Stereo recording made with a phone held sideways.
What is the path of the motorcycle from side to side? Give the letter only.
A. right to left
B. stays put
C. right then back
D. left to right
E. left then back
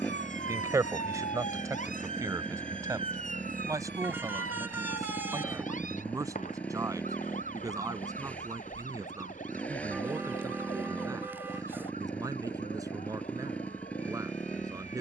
B.